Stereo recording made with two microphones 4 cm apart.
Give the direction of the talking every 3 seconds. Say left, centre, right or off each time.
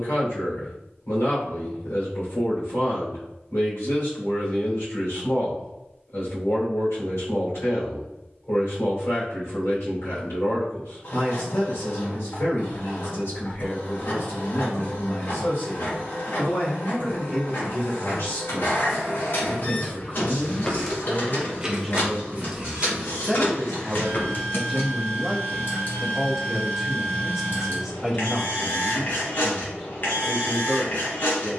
left, left, left, left, left, left, left, centre, centre, centre, centre.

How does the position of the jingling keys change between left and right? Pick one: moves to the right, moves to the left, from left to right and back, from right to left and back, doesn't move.
from left to right and back.